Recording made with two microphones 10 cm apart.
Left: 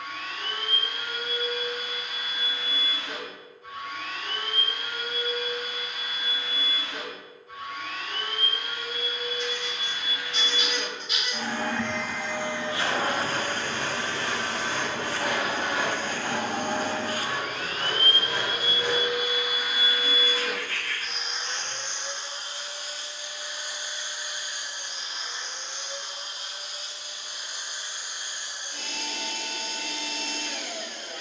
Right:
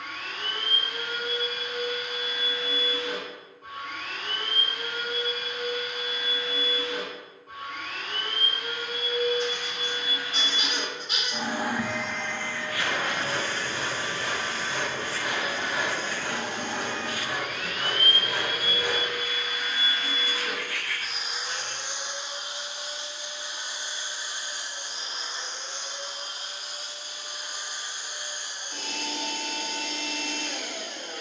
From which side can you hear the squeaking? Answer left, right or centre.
right.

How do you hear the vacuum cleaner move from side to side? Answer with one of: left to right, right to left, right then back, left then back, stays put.
left then back.